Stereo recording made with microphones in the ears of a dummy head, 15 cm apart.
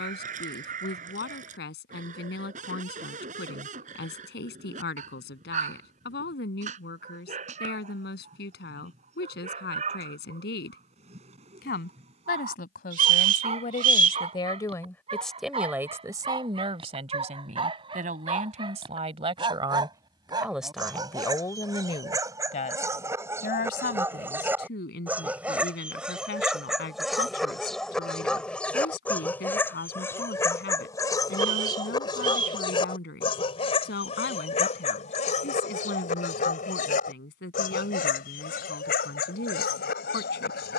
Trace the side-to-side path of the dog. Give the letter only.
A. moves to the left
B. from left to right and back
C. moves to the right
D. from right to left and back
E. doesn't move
A.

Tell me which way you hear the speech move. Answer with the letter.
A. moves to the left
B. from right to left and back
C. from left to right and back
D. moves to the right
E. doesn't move
C.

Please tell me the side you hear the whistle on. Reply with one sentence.
You can hear the whistle on the right.